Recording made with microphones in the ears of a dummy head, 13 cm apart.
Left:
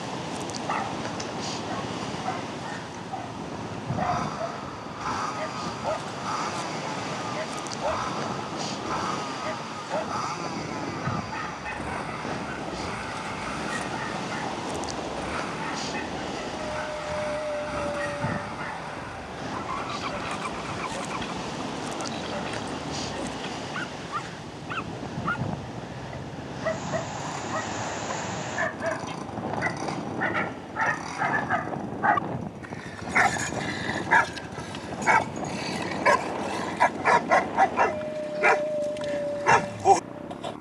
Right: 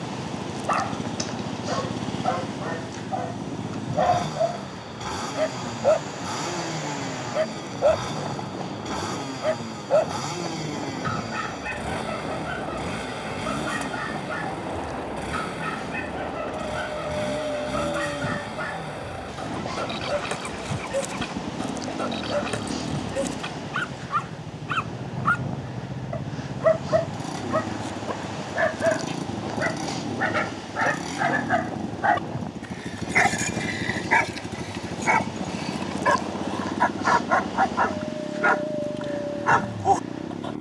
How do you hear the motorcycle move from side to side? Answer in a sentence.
In this clip you hear the motorcycle stay put.